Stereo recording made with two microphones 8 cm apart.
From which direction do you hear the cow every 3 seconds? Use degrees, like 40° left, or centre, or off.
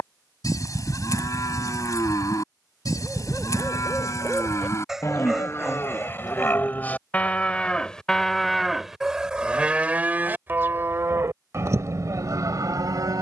50° left, 40° left, 10° left, 30° right, 50° right.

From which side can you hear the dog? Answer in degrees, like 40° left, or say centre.
10° right.